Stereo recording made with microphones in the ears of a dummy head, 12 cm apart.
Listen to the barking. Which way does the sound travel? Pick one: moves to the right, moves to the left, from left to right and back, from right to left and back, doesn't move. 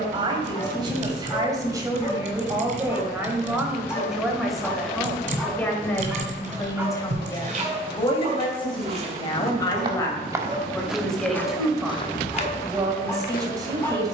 from left to right and back.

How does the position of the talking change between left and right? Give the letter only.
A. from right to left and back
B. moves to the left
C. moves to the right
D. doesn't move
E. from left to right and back
A.